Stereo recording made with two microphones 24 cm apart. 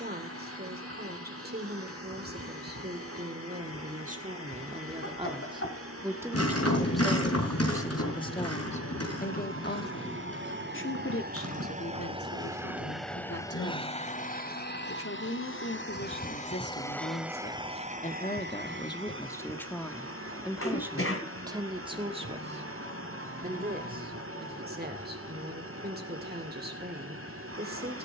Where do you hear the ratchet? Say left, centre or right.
left.